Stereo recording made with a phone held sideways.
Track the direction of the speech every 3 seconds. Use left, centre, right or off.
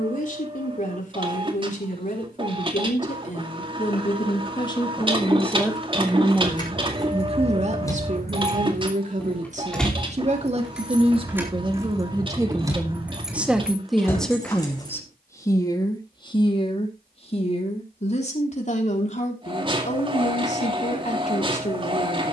left, left, right, right, centre, left, left, left.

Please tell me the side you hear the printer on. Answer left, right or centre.
right.